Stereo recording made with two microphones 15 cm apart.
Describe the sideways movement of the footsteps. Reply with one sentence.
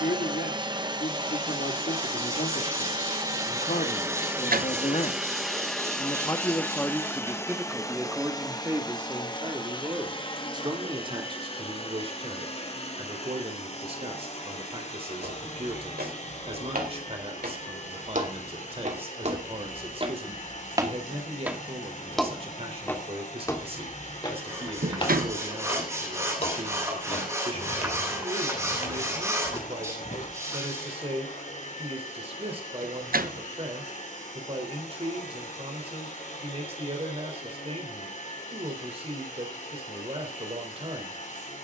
In this clip you hear the footsteps travel towards the left.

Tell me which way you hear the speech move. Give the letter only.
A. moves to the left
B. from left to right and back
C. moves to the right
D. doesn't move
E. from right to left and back
C.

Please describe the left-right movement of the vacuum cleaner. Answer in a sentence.
In this clip you hear the vacuum cleaner go from the right side to the left.